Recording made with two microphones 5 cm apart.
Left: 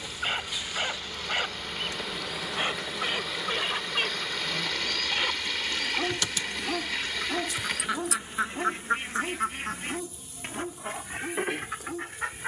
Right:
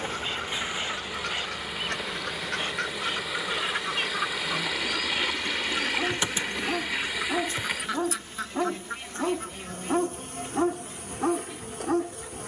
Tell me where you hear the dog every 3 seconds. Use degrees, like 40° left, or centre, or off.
20° left, 10° left, 20° right, 70° right.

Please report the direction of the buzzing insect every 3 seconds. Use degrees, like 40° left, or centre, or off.
10° right, 10° right, 30° right, 60° right.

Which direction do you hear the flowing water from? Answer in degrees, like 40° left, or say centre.
10° right.